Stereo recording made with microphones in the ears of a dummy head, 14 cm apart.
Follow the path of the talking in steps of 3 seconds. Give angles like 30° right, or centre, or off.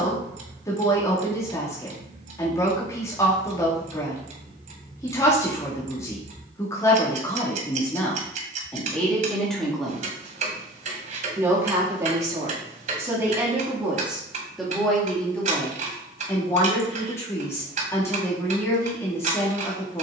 20° left, 20° left, 20° left, 10° right, 10° right, 10° left, 20° left.